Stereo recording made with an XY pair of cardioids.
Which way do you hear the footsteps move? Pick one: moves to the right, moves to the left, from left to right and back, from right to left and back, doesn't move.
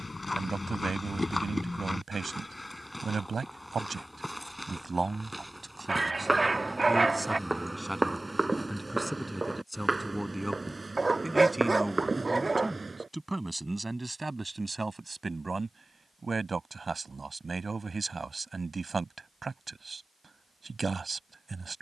moves to the right.